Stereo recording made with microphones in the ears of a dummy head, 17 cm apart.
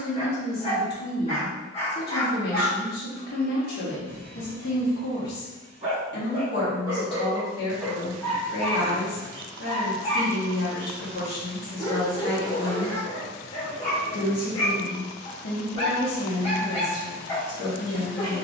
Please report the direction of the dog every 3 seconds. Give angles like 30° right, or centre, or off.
30° left, 50° right, centre, 30° left, 30° left, 30° left.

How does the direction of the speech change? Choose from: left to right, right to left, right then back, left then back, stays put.
stays put.